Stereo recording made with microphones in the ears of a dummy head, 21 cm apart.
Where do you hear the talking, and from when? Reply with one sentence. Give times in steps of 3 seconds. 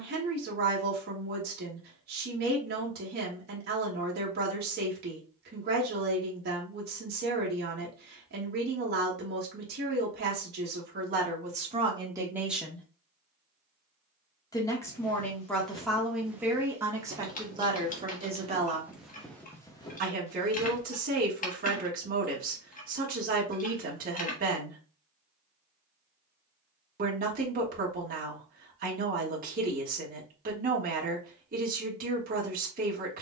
You can hear the talking on the right from 0 s, in the centre from 12 s and on the right from 18 s.